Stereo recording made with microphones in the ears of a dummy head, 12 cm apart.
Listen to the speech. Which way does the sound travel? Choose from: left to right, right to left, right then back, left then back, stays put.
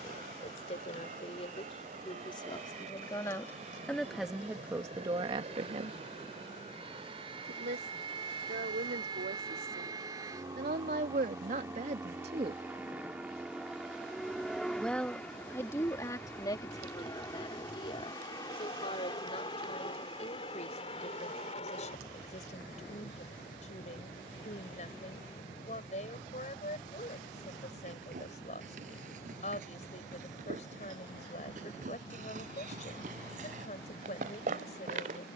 right then back.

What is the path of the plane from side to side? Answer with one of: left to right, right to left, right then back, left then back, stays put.
right to left.